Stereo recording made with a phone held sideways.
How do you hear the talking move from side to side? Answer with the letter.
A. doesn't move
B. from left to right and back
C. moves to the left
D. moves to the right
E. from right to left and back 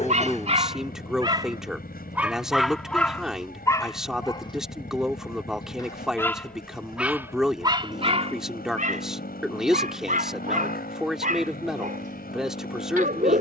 A.